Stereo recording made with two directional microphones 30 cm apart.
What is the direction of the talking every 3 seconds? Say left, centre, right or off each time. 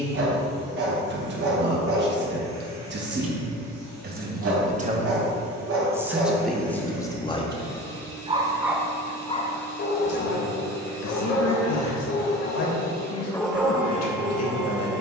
right, right, centre, left, left.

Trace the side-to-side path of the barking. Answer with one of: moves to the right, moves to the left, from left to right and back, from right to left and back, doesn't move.
from right to left and back.